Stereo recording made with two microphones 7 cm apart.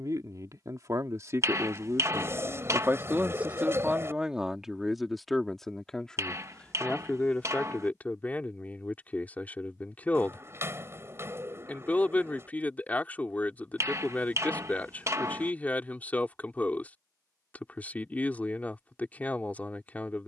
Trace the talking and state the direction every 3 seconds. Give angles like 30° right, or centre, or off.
40° right, 10° right, 20° left, 20° left, 20° left, 20° left, 20° left.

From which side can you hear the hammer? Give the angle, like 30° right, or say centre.
40° right.